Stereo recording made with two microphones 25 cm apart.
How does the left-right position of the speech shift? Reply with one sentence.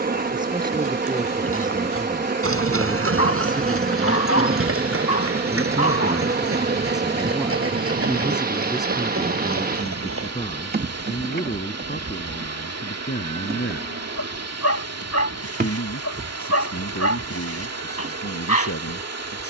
You can hear the speech move to the left.